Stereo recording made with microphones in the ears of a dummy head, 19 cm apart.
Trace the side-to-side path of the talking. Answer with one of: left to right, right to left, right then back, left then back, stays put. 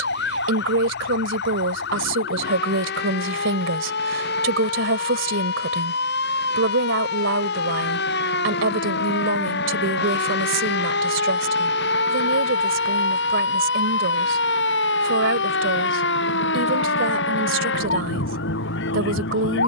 stays put.